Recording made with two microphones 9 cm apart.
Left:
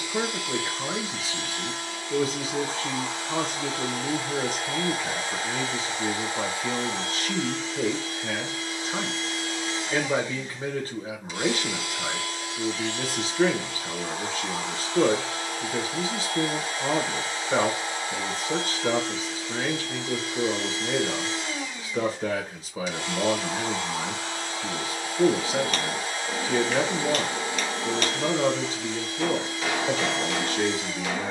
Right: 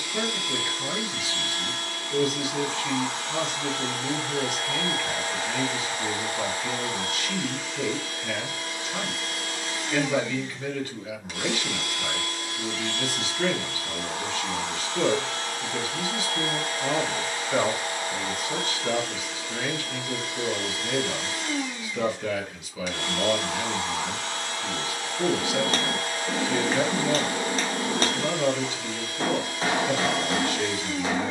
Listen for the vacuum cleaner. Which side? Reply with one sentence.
In this clip you hear the vacuum cleaner on the right.